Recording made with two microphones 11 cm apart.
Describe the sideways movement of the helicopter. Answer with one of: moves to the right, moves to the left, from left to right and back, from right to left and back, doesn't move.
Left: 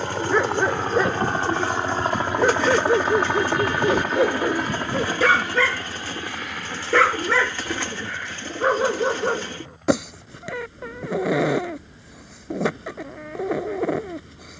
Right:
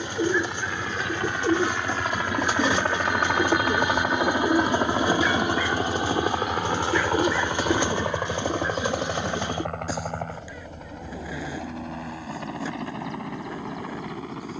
moves to the right.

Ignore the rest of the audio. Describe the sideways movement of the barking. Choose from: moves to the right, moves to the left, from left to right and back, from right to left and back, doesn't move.
doesn't move.